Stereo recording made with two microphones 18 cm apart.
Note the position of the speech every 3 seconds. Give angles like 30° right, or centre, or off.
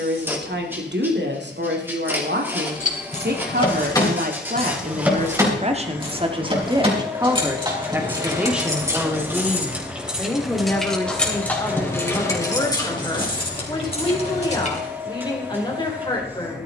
70° right, 50° right, 20° right, 10° left, 20° left, 20° left.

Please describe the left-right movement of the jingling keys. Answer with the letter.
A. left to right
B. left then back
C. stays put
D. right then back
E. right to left
D.